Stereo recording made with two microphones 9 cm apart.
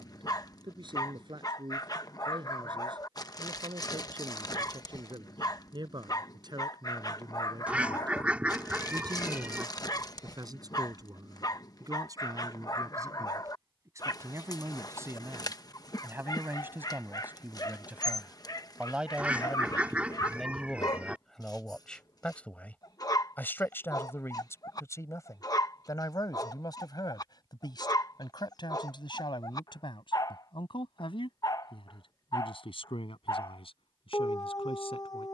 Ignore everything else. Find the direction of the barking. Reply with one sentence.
You can hear the barking on the left.